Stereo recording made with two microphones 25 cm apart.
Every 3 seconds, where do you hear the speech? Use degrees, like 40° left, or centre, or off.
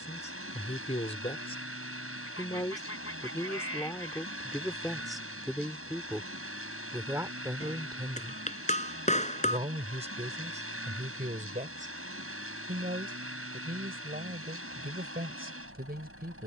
20° left, centre, 10° right, 30° right, 40° right, 40° right.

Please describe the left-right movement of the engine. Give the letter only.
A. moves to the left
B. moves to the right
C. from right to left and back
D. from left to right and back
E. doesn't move
E.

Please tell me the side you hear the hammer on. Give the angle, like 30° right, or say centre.
30° left.